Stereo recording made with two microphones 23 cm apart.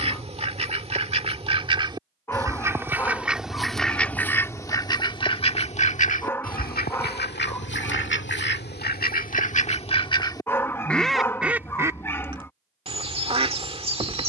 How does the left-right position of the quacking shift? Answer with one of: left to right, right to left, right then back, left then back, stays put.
left then back.